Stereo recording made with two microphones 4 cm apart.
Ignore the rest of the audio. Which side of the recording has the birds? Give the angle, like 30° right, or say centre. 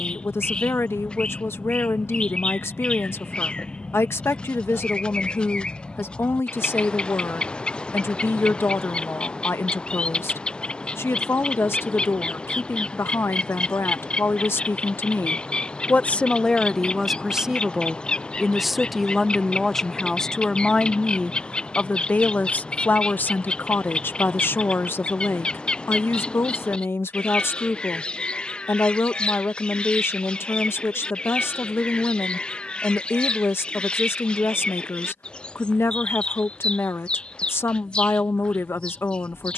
20° left.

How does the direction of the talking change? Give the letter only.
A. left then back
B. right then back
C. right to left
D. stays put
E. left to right
B.